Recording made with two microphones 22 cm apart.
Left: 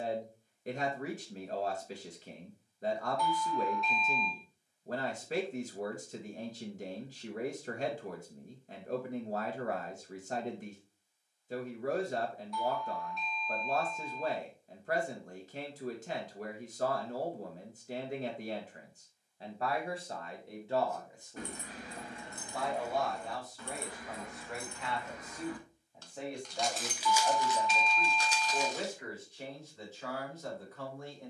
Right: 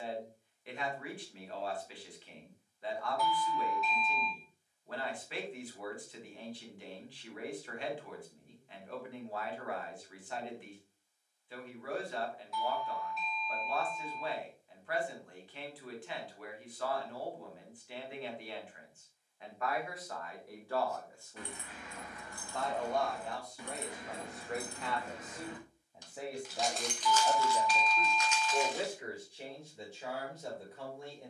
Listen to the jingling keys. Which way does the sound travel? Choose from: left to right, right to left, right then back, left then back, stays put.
right then back.